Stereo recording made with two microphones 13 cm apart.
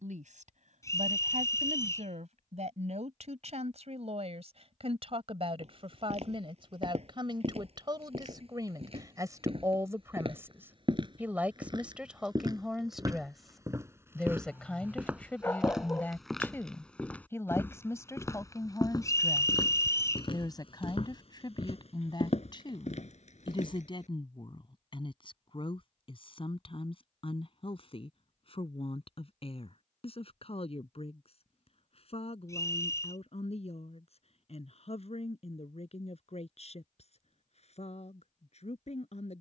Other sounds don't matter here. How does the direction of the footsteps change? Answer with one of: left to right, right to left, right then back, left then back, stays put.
right to left.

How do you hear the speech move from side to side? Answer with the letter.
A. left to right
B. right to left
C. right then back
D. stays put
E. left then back
B.